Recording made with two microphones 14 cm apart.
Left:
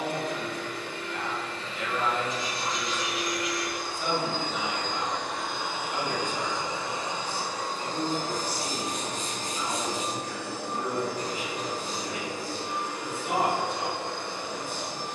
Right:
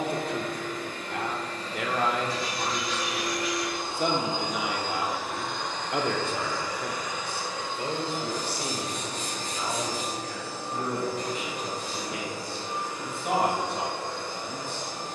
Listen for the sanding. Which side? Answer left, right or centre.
left.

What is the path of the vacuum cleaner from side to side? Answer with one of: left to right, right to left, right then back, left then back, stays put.
right to left.